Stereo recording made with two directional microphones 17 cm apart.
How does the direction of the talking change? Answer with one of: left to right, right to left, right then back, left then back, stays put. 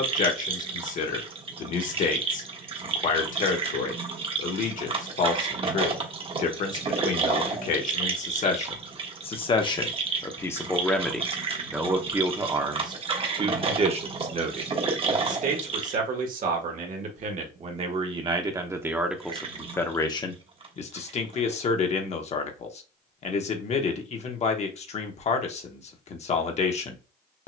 right then back.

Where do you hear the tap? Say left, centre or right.
right.